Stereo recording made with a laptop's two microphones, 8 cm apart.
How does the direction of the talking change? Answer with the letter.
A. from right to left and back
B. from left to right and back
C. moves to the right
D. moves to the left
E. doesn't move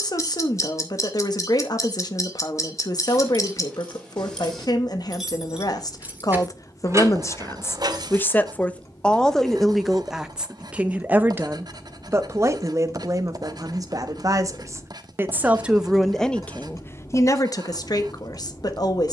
B.